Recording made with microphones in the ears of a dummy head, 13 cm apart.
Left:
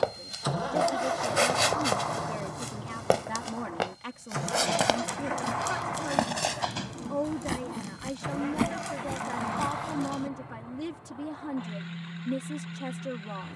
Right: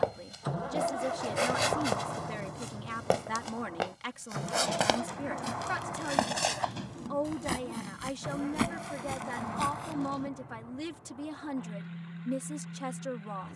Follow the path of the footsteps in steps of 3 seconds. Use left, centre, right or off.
left, centre, right, right, off.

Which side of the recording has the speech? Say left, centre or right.
right.